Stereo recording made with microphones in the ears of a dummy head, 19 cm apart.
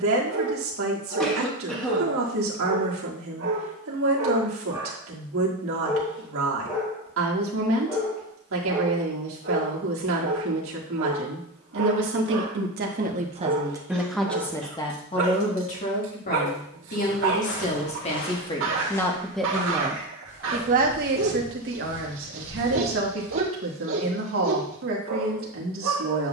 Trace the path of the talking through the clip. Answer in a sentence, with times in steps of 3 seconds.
You can hear the talking on the right from 0 s, on the left from 15 s, in the centre from 18 s and on the right from 21 s.